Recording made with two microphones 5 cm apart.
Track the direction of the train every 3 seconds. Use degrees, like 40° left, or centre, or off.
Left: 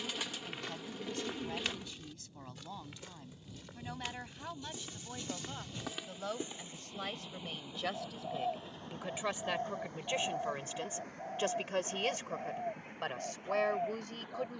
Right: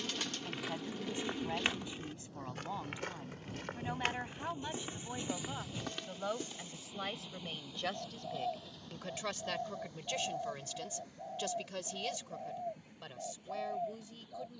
70° right, 30° right, 10° left, 40° left, 50° left.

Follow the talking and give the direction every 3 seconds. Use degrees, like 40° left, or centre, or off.
20° right, 20° right, centre, 30° left, 60° left.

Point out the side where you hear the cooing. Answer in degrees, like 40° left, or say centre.
10° left.